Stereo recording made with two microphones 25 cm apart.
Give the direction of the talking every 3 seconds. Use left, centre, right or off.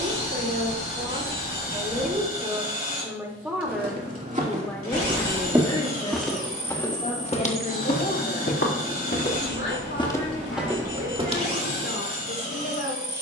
right, centre, left, left, left.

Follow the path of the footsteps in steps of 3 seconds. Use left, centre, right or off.
off, right, left, centre, off.